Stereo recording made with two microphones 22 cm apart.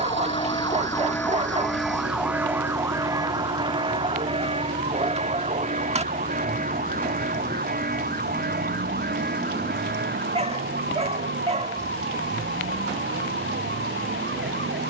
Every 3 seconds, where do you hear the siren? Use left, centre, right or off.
centre, right, right, right, right.